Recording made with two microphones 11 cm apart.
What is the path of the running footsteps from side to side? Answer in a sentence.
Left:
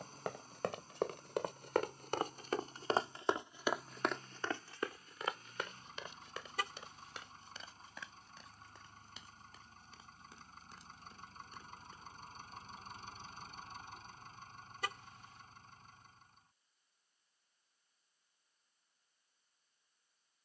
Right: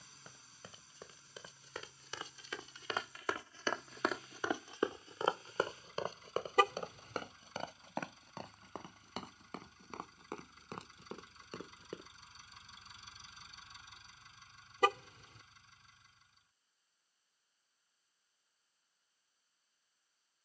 In this clip you hear the running footsteps move to the right.